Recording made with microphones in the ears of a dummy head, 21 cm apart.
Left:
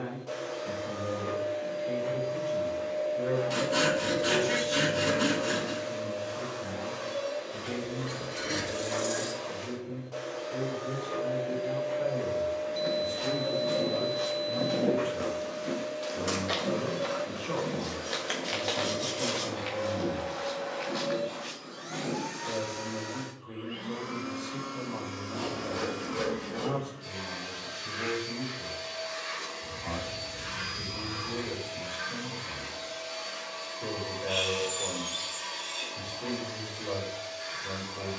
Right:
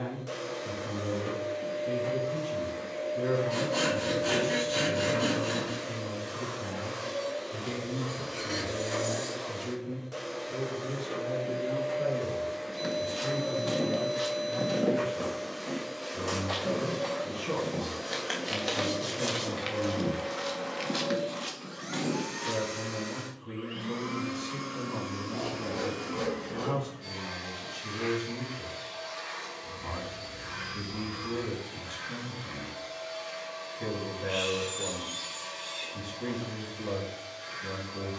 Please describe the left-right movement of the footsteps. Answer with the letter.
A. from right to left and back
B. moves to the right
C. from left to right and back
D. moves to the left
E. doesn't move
A.